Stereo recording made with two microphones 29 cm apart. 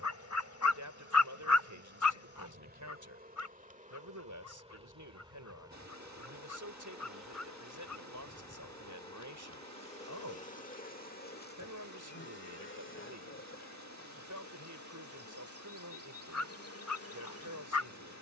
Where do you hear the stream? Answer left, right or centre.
right.